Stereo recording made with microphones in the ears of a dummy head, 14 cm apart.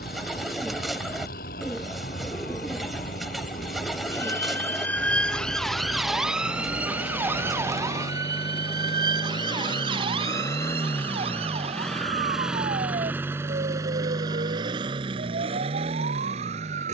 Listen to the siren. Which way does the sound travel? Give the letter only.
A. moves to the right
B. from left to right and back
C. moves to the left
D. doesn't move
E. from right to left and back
A.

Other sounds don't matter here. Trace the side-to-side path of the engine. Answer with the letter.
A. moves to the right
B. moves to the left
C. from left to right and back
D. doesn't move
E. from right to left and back
A.